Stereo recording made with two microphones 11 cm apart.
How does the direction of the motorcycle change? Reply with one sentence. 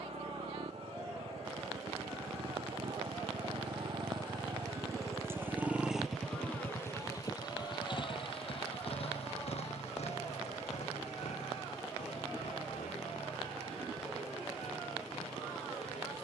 In this clip you hear the motorcycle move to the left.